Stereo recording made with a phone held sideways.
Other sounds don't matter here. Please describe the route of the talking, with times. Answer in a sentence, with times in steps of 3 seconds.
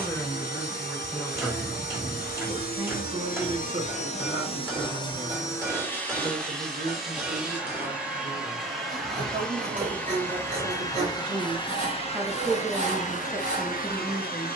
In this clip you hear the talking in the centre from 0 s, on the right from 3 s and in the centre from 12 s.